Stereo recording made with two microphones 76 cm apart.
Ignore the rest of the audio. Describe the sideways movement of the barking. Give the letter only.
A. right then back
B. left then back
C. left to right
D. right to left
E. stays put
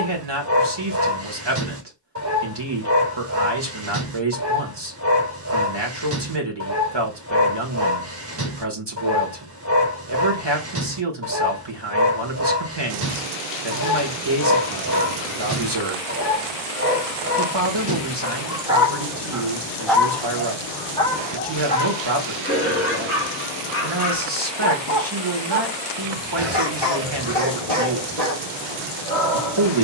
D.